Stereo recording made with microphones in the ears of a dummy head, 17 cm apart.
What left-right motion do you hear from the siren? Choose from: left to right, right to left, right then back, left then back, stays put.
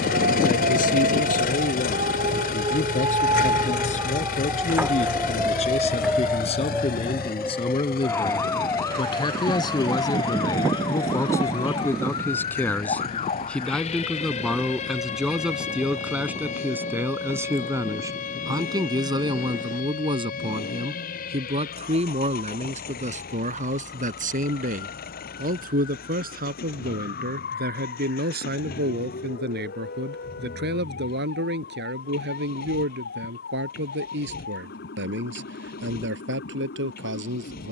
right to left.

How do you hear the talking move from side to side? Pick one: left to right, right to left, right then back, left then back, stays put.
left to right.